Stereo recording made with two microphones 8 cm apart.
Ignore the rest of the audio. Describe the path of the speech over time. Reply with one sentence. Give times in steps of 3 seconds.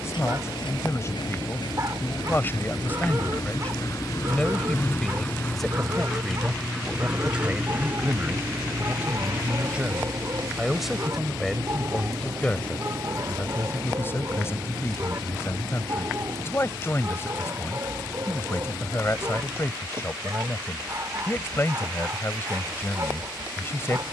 You can hear the speech on the left from 0 s, in the centre from 3 s and on the left from 12 s.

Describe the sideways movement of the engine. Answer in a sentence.
You can hear the engine move to the right.